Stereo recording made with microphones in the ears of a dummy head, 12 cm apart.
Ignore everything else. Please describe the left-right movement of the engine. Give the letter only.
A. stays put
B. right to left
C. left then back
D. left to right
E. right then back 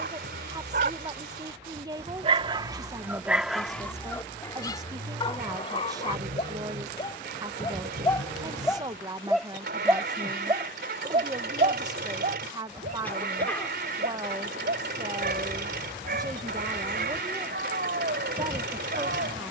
A.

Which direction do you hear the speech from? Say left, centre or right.
right.